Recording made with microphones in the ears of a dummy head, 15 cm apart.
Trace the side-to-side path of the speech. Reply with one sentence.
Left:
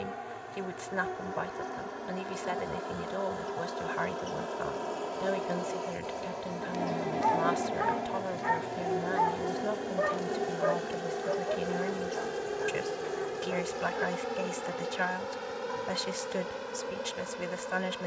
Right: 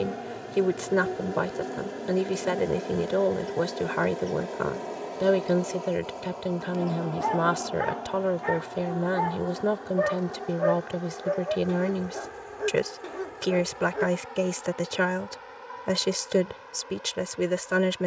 You can hear the speech stay put.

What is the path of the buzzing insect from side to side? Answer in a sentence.
You can hear the buzzing insect move to the left.